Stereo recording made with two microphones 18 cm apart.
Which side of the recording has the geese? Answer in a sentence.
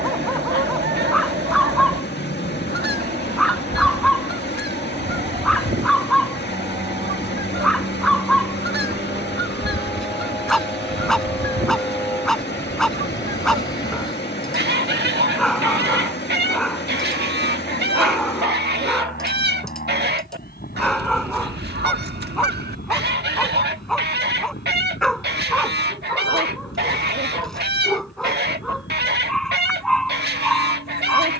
You can hear the geese on the right.